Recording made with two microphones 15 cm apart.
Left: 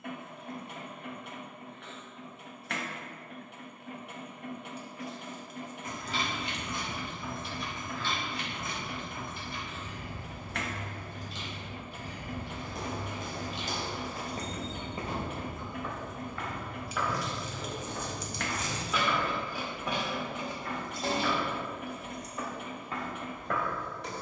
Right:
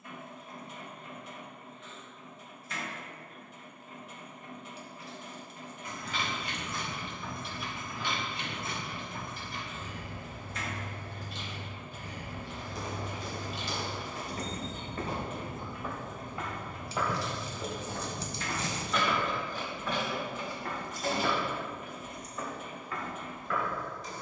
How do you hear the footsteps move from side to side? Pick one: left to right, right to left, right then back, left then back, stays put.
right then back.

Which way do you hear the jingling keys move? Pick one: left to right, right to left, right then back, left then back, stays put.
right then back.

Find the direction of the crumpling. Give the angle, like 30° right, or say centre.
30° right.